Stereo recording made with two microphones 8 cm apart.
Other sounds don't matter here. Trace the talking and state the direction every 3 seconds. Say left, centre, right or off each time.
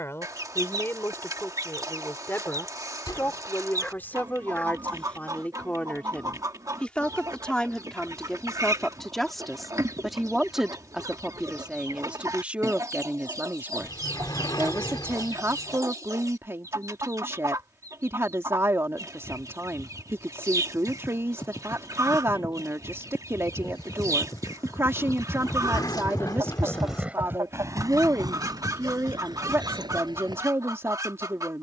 left, left, centre, centre, right, right, right, right, right, right, right.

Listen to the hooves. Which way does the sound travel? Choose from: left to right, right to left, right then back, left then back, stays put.
left to right.